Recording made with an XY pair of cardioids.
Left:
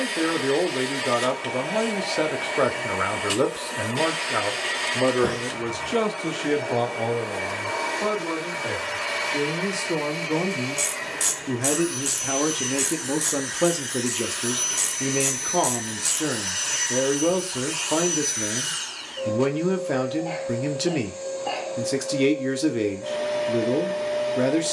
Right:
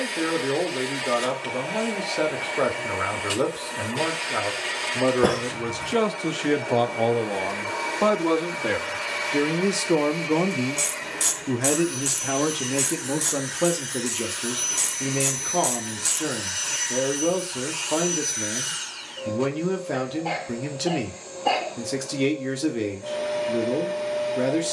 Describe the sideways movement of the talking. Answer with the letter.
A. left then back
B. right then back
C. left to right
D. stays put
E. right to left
B.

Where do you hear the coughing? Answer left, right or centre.
right.